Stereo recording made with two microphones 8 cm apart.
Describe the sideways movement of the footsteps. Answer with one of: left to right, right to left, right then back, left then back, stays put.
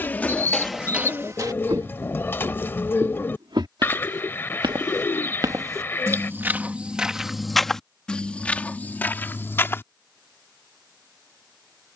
right then back.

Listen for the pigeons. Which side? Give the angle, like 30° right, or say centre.
30° left.